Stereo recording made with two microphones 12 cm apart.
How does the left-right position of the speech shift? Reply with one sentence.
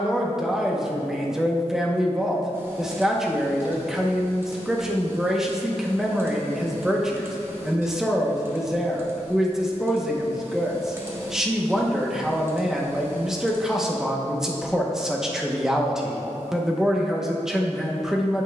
You can hear the speech stay in one place.